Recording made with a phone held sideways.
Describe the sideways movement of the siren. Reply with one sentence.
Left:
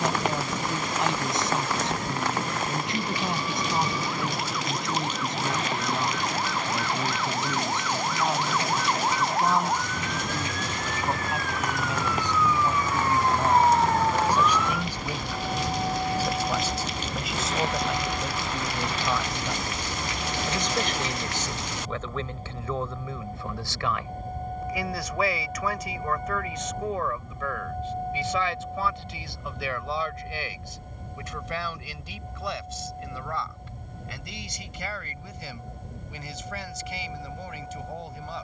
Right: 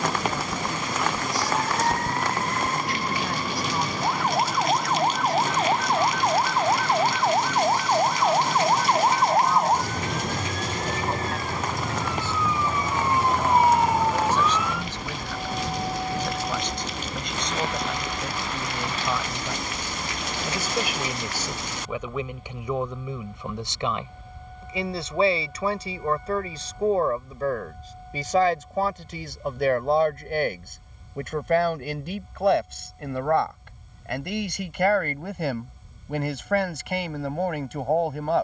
In this clip you hear the siren move to the left.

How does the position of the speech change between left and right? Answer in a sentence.
You can hear the speech move to the right.